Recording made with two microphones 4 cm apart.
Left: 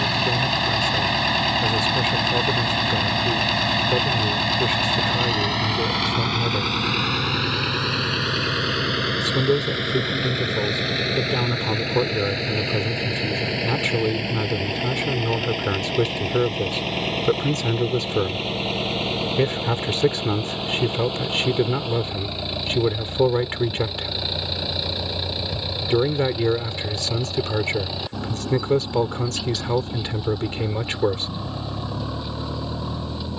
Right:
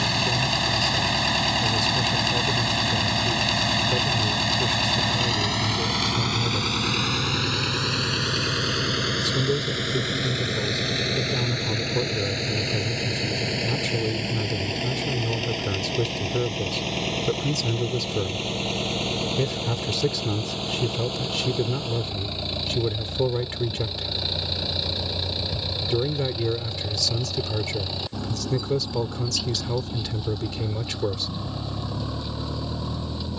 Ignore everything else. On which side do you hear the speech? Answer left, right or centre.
left.